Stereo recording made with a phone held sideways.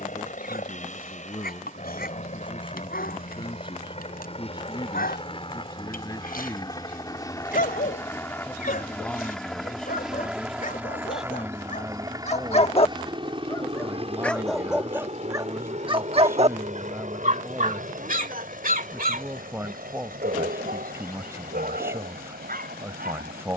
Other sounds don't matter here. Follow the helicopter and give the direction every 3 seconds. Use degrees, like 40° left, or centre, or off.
50° left, 40° left, 20° left, 10° right, 30° right, 50° right, 60° right, 70° right.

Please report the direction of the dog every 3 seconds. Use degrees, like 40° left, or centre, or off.
80° left, 80° left, 70° left, 60° left, 20° left, 40° right, 70° right, 80° right.